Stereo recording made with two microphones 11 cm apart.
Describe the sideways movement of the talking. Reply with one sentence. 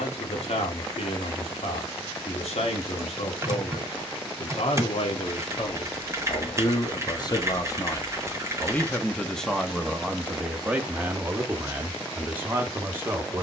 In this clip you hear the talking travel towards the right.